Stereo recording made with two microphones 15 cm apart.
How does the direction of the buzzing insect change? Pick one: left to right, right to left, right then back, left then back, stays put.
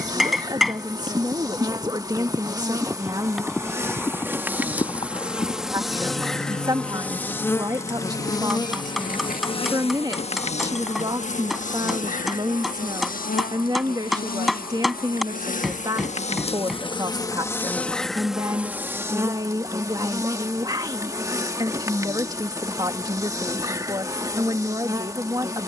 left then back.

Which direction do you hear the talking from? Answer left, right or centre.
right.